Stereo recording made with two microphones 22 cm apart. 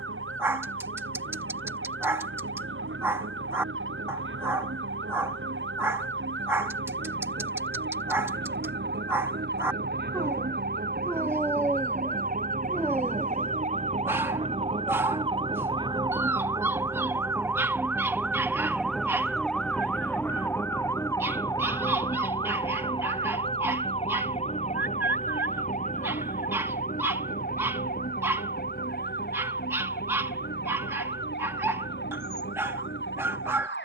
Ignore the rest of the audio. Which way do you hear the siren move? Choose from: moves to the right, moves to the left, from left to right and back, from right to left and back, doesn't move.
moves to the left.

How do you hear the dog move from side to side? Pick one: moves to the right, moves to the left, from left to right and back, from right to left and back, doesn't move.
doesn't move.